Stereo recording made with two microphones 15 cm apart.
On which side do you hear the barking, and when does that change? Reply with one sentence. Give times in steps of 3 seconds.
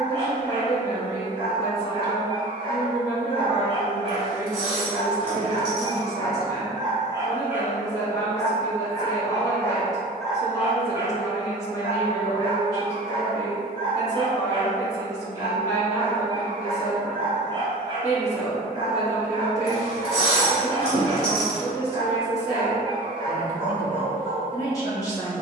You can hear the barking on the right from 0 s, in the centre from 6 s and on the right from 12 s.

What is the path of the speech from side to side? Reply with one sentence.
In this clip you hear the speech stay in one place.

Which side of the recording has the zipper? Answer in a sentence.
In this clip you hear the zipper on the left.